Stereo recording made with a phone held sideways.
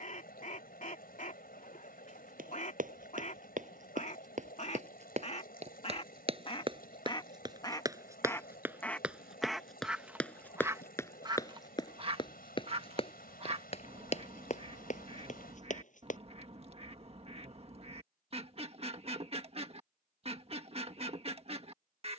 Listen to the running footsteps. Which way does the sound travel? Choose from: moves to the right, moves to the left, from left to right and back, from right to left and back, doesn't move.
moves to the left.